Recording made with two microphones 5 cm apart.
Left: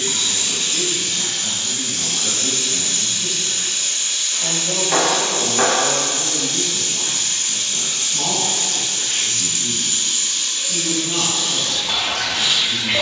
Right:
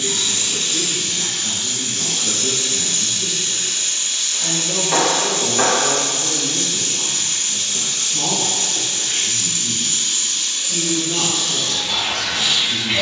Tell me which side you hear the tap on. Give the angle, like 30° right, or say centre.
50° left.